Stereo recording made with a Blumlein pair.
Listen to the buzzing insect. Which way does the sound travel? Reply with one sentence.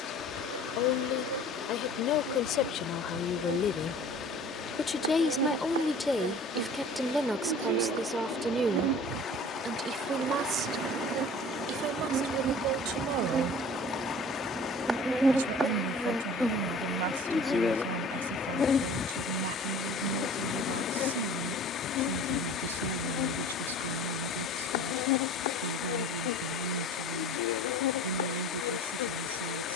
You can hear the buzzing insect move to the left.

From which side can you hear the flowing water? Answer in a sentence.
In this clip you hear the flowing water on the left.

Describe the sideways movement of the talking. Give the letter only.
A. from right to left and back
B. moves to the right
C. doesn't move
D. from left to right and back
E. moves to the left
B.